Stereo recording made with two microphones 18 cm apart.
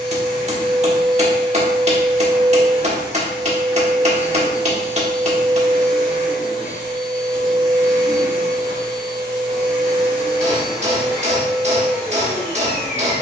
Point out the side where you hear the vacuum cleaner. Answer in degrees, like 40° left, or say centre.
30° right.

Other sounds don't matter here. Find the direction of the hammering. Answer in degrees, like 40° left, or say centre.
40° right.